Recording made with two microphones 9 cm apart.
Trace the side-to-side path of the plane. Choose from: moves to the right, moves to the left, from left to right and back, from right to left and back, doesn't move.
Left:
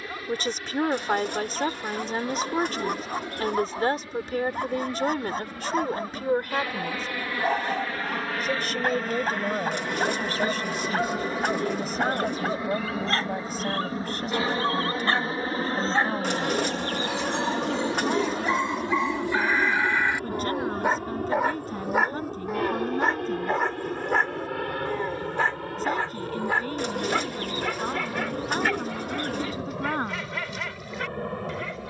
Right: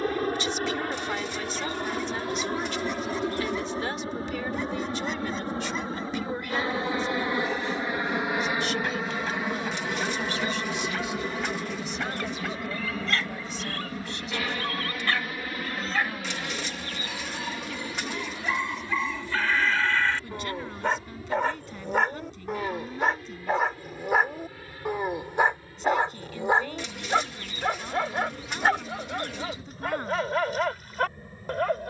moves to the left.